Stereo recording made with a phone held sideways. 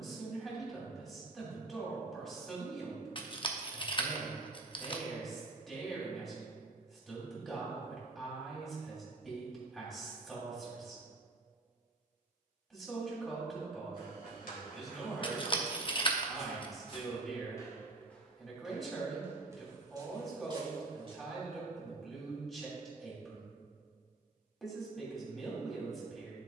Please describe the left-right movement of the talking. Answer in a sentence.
In this clip you hear the talking stay put.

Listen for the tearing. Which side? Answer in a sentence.
You can hear the tearing on the left.